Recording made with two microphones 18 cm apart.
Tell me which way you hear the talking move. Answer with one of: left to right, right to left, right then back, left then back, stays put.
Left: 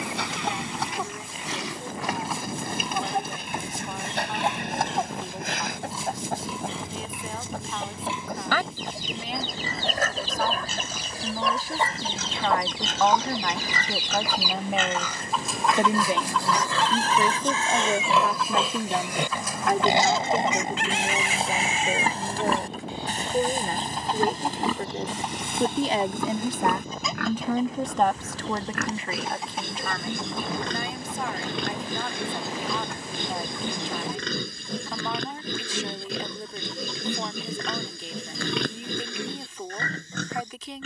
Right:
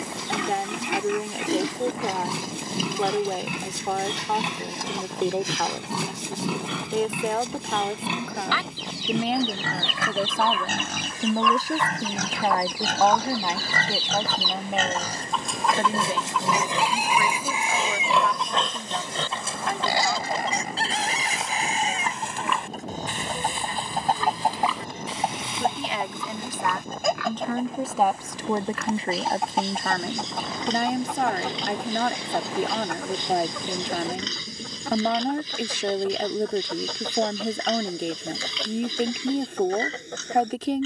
left then back.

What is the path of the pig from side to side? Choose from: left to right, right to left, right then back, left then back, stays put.
right to left.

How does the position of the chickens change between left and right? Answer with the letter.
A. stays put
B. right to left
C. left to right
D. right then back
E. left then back
C.